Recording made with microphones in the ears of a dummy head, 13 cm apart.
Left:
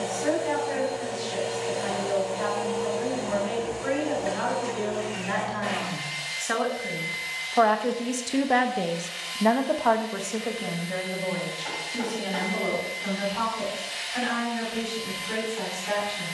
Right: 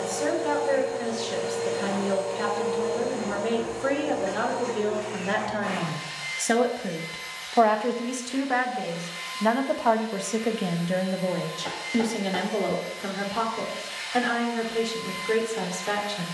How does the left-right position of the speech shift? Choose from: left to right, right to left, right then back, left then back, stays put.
left then back.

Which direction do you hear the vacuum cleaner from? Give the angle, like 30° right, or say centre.
30° left.